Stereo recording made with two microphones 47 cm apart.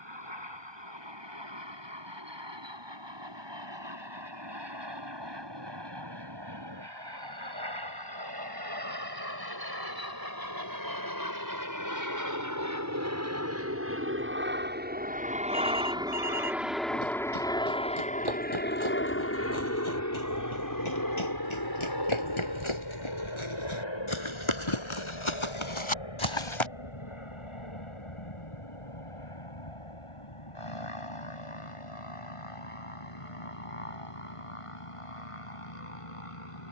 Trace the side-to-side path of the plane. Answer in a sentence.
You can hear the plane travel towards the left.